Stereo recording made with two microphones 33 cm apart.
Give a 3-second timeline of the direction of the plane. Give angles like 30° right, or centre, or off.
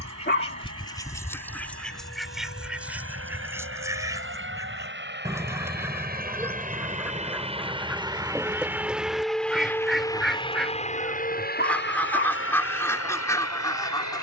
50° right, 40° right, 20° right, 10° left, 40° left.